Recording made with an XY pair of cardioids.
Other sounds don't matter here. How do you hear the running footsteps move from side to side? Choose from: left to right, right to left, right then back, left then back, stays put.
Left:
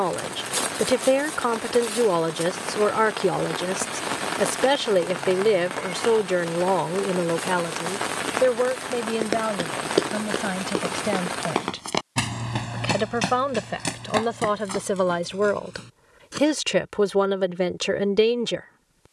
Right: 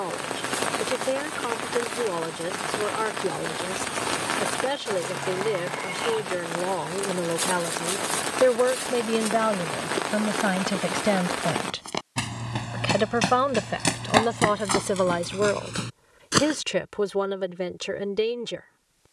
left to right.